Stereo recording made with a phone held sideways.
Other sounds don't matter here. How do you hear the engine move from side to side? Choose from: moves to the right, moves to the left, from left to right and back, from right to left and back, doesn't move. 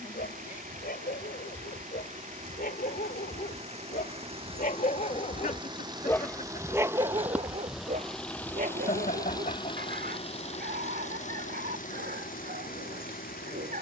moves to the left.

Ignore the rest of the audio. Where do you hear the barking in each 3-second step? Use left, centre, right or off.
left, left, right, right, right.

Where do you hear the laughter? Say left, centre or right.
left.